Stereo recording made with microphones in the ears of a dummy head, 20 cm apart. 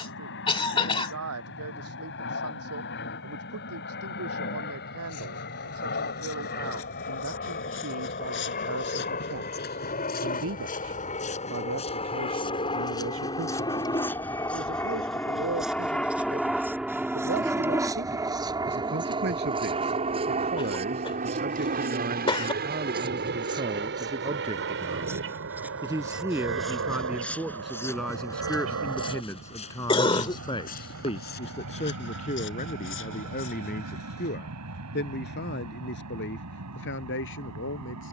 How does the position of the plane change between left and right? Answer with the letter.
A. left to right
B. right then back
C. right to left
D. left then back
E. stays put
A.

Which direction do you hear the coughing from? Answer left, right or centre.
left.